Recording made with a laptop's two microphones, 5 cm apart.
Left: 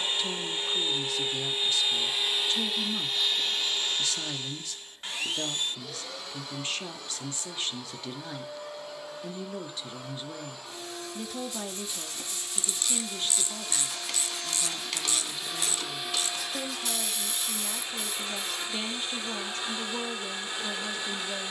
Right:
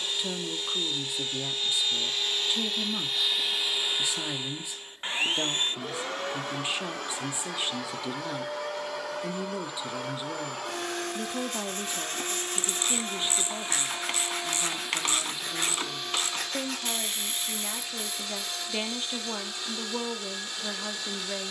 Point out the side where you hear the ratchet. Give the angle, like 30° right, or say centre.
40° right.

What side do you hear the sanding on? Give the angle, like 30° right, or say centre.
60° right.